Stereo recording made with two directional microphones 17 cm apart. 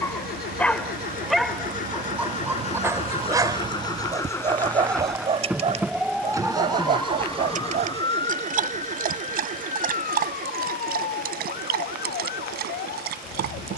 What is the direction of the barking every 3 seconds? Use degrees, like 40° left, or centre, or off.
centre, 30° right, 50° right, 60° right, 60° right.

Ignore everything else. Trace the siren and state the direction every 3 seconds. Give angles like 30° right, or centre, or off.
50° right, 20° right, 20° left, 50° left, 60° left.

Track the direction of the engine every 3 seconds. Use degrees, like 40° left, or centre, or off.
50° left, 10° left, 30° right, 50° right, 60° right.